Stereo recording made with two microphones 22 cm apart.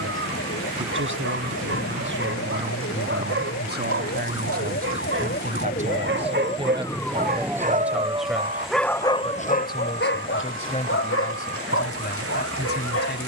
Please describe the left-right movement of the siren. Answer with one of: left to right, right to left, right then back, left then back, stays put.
left to right.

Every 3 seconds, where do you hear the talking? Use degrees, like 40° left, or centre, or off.
60° right, 40° right, 10° right, 30° left, 50° left.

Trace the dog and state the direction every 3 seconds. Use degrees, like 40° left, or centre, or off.
70° right, 60° right, 30° right, 60° left, 80° left.